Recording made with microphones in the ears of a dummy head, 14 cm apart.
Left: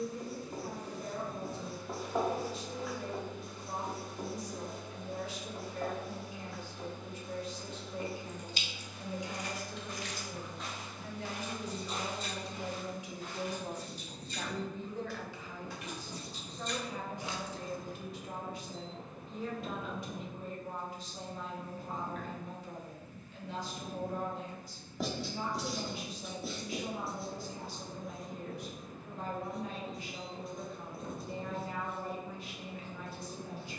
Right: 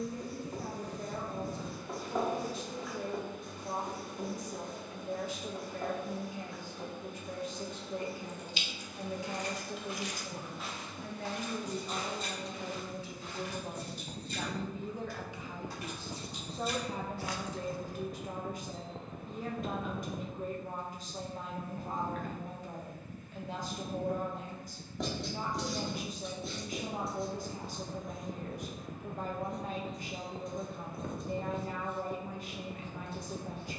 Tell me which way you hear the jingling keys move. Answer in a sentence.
You can hear the jingling keys move from left to right and back again.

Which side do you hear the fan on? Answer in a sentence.
You can hear the fan on the right.